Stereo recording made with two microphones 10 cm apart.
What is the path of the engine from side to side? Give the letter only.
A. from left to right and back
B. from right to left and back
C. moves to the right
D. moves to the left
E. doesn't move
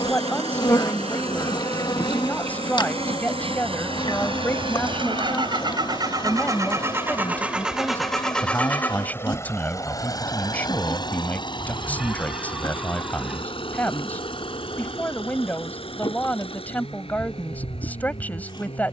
D.